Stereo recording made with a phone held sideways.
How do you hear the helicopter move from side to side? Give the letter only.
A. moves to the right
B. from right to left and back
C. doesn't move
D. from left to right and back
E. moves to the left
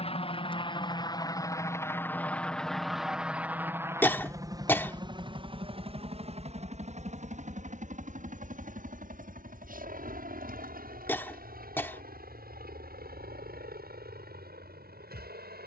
A.